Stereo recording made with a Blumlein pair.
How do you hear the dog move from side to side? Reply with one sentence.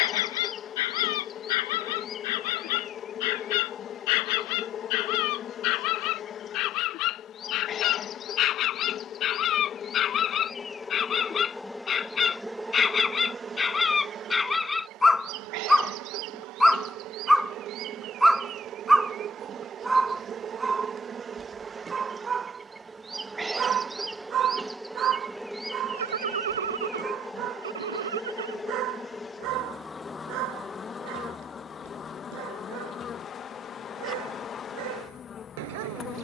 In this clip you hear the dog travel towards the right.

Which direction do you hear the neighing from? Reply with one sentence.
In this clip you hear the neighing on the right.